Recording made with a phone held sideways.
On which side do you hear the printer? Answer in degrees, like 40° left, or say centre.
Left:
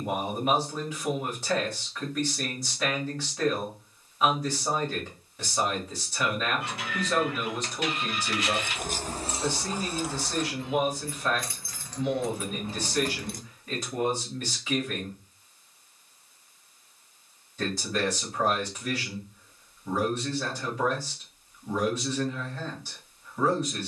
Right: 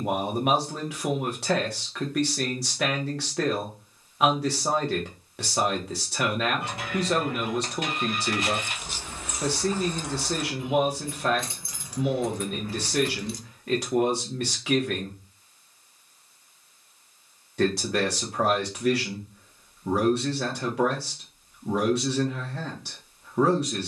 50° right.